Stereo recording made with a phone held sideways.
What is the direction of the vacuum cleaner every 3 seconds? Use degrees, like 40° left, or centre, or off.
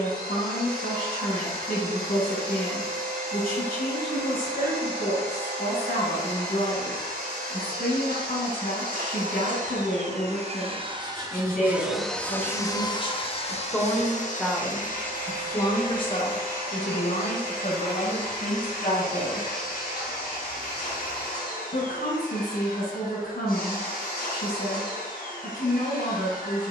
70° right, 70° right, 70° right, 40° right, 40° left, 70° left, 70° left, 70° left, 70° left.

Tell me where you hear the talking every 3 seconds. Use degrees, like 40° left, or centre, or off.
70° left, 70° left, 70° left, 70° left, 20° left, 40° left, 60° left, 70° left, 70° left.